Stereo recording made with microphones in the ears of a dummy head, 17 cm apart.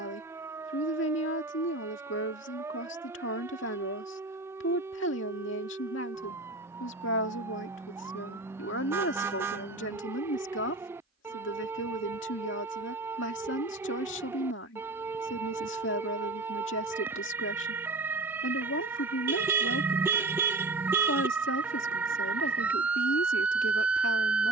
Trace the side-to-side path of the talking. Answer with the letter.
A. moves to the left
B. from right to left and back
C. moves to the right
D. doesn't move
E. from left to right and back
D.